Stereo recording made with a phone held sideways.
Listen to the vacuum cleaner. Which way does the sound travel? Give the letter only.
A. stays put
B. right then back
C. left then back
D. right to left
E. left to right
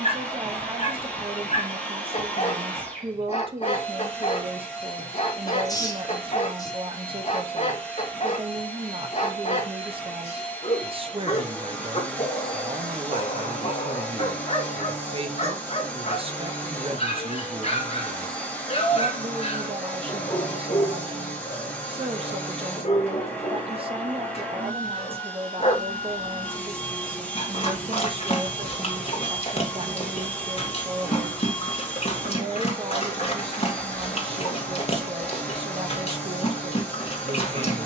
A.